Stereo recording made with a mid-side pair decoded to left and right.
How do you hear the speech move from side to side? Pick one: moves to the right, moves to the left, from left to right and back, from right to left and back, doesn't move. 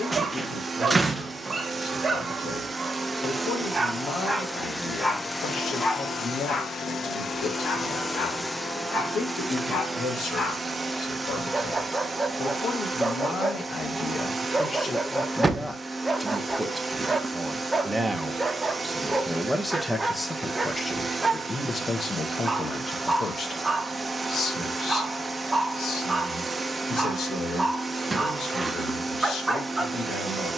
from left to right and back.